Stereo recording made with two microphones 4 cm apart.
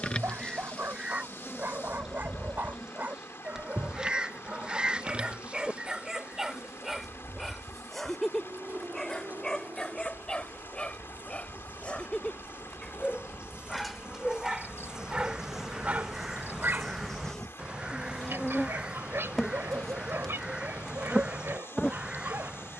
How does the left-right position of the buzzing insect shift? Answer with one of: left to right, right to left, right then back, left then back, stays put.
right then back.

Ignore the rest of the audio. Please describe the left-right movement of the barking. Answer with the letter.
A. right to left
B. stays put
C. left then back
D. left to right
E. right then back
C.